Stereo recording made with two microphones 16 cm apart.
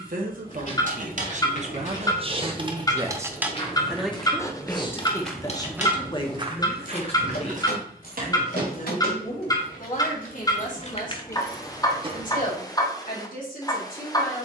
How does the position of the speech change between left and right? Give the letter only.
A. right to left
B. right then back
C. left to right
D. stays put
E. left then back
A.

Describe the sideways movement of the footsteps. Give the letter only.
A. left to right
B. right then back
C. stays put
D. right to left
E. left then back
A.